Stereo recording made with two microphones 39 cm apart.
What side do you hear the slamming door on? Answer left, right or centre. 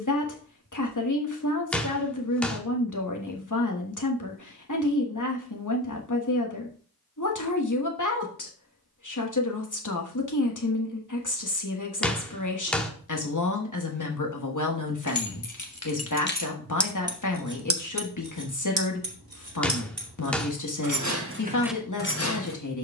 centre.